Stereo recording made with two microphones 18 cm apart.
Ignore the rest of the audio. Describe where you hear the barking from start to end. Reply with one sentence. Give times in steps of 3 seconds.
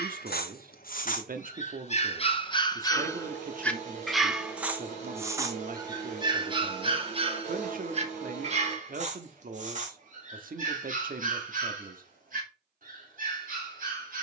In this clip you hear the barking on the left from 0 s, in the centre from 3 s and on the right from 6 s.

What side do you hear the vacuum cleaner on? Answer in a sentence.
You can hear the vacuum cleaner on the right.